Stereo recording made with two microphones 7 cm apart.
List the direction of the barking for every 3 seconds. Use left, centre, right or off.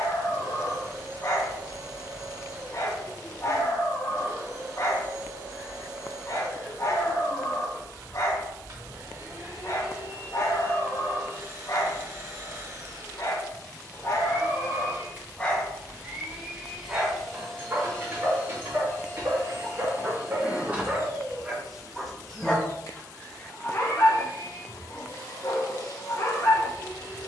left, left, left, left, left, centre, right, centre, left.